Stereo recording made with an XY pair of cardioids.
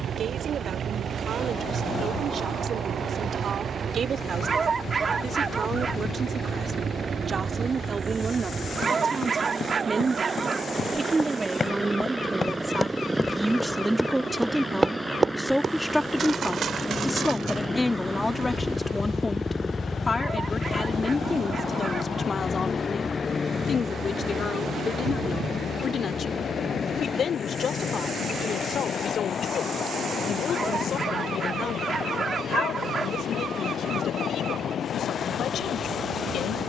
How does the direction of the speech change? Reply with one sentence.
You can hear the speech go from the right side to the left.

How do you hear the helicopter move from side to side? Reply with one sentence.
In this clip you hear the helicopter travel towards the left.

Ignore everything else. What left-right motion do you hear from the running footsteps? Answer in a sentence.
You can hear the running footsteps travel towards the right.